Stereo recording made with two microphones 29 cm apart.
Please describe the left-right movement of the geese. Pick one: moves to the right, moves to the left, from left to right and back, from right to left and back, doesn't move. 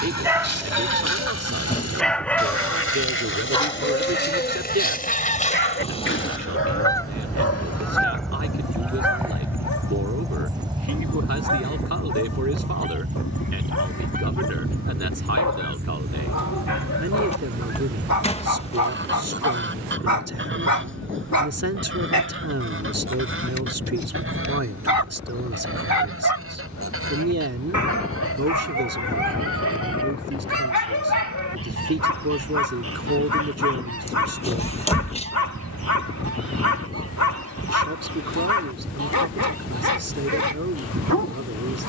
moves to the right.